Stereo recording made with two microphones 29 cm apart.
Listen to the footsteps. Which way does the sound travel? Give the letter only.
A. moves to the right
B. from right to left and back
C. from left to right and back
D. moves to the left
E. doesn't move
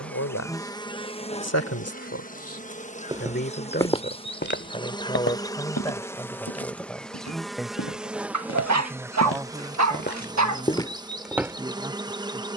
B.